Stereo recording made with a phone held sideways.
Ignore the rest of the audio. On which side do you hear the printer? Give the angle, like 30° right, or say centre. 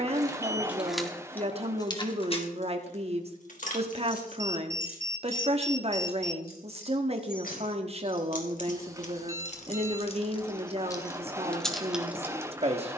20° right.